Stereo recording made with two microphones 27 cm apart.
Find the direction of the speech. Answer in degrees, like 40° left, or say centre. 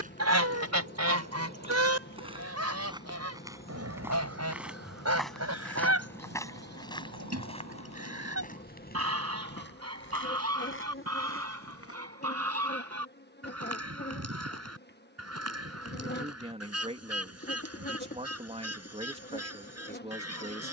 20° right.